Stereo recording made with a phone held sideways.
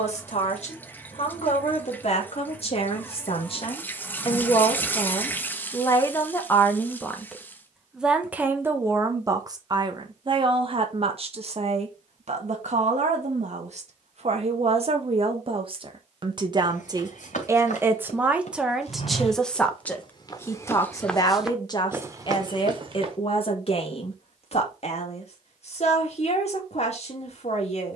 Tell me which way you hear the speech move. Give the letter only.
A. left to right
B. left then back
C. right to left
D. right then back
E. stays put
D.